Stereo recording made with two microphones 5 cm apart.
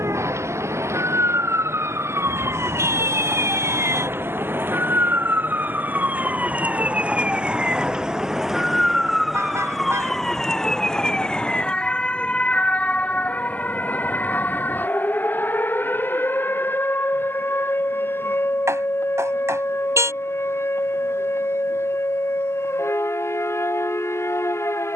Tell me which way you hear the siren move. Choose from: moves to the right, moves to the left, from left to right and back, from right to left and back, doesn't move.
moves to the left.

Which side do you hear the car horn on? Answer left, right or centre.
right.